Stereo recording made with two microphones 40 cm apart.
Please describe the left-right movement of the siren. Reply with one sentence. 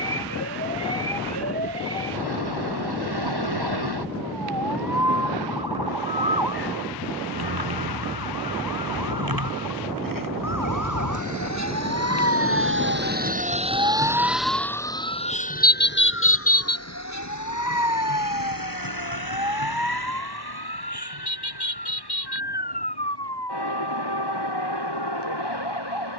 You can hear the siren move to the left.